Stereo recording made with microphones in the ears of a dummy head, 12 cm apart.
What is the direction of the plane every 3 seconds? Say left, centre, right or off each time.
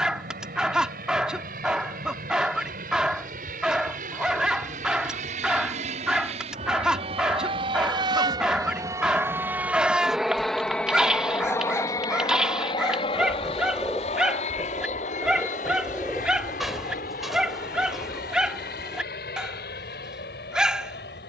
right, right, right, centre, left, left, left.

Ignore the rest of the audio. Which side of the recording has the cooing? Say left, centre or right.
centre.